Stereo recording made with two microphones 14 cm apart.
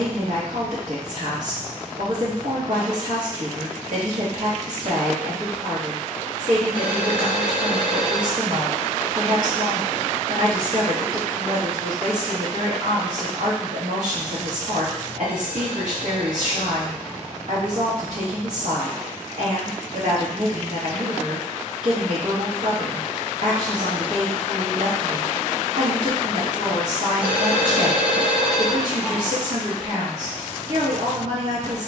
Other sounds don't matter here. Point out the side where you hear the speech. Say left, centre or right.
right.